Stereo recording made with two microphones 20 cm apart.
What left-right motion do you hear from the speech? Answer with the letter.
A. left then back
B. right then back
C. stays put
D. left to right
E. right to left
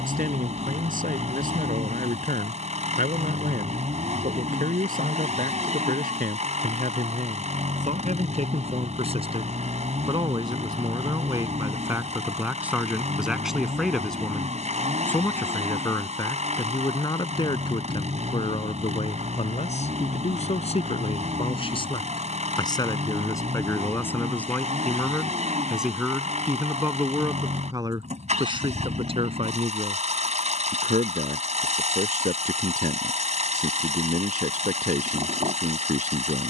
A.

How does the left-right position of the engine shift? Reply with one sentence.
In this clip you hear the engine stay put.